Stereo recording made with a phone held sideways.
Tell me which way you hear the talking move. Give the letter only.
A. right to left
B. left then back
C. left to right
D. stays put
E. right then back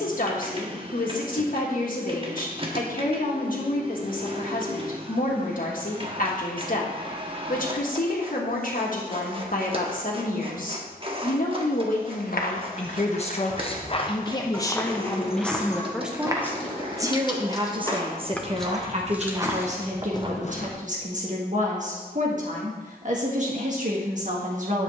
C.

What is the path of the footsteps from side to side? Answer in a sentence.
You can hear the footsteps move from left to right and back again.